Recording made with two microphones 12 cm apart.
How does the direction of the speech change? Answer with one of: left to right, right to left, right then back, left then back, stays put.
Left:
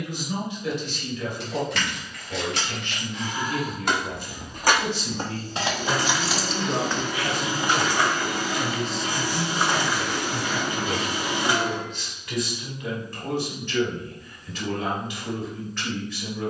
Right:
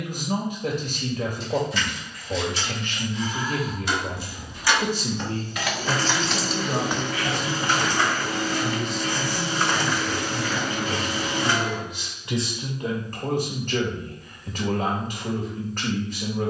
left then back.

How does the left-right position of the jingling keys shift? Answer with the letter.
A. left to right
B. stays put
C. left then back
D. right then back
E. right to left
A.